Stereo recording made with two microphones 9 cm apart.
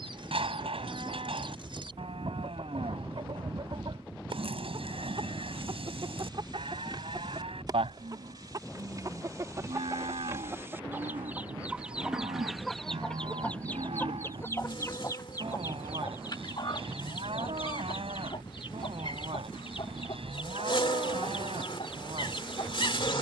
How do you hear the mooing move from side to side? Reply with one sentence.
You can hear the mooing stay in one place.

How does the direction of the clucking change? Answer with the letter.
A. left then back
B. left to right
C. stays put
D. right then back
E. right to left
E.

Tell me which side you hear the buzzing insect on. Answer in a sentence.
In this clip you hear the buzzing insect on the left.